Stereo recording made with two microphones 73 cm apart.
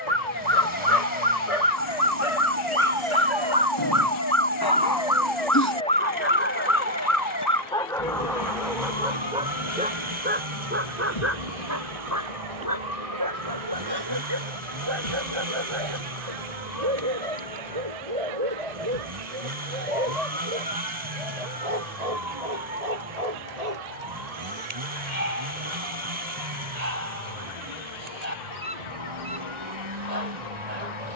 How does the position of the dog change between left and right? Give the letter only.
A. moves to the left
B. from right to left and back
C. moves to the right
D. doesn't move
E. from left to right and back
C.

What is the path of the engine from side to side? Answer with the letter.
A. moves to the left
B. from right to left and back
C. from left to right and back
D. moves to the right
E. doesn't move
E.